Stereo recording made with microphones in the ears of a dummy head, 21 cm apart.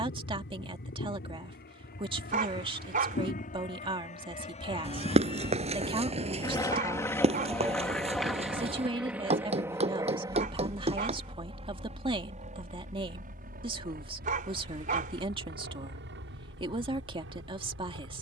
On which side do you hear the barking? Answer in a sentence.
You can hear the barking on the right.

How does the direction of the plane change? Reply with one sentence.
In this clip you hear the plane move from left to right.